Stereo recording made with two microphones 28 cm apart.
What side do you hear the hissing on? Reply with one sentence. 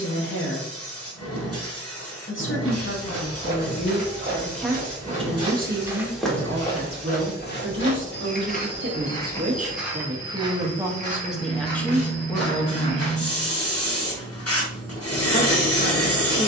In this clip you hear the hissing on the left.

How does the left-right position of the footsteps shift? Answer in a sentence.
You can hear the footsteps move from right to left and back again.